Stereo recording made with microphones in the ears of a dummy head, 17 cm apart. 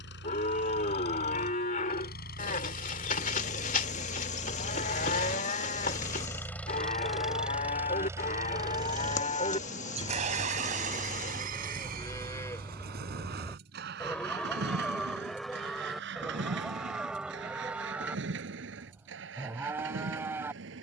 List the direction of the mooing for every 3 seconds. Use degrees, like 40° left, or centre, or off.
40° left, 40° left, 40° left, 30° left, 10° left, centre, 10° right.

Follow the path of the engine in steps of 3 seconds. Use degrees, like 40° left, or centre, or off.
60° left, 30° left, 10° right, 40° right, 60° right, 70° right, 70° right.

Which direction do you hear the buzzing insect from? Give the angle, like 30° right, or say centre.
40° left.